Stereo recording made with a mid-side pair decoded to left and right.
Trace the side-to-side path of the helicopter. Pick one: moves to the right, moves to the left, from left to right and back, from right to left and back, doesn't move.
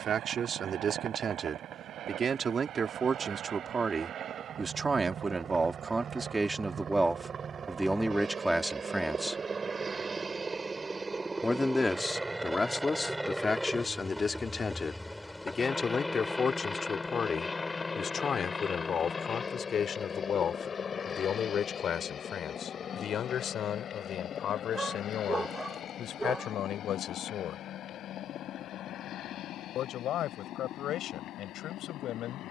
moves to the left.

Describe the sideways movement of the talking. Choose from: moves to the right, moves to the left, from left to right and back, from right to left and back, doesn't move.
moves to the left.